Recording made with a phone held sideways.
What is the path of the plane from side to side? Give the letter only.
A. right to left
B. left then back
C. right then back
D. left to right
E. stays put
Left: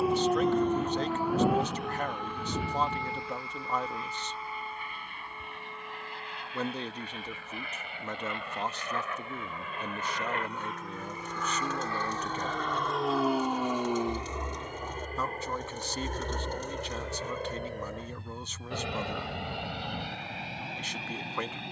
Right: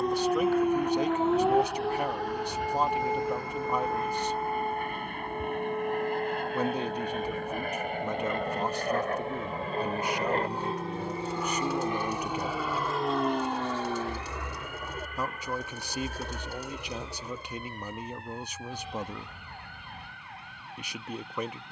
A.